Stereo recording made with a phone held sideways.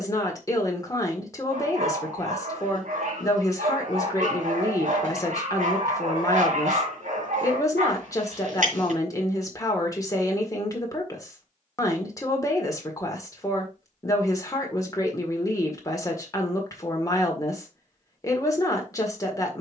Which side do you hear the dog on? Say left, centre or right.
right.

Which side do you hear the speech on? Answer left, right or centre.
left.